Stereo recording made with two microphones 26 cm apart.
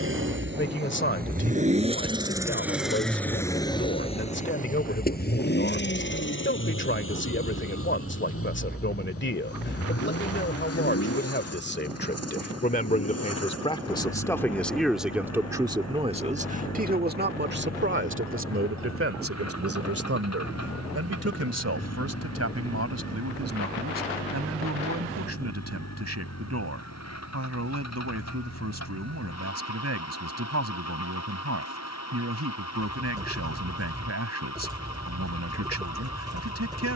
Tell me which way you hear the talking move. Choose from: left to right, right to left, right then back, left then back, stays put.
left to right.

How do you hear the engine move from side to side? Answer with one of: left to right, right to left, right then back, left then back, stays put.
right to left.